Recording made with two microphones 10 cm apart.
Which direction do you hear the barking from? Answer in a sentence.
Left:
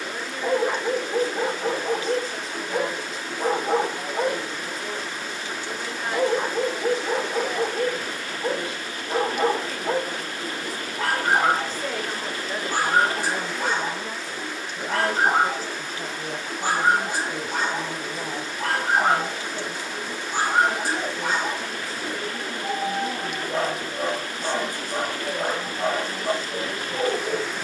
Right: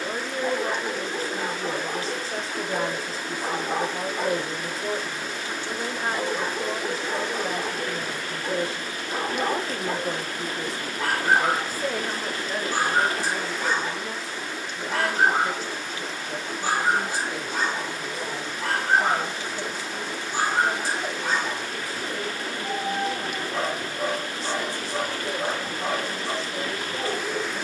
In this clip you hear the barking on the left.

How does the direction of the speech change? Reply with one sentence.
You can hear the speech move from right to left.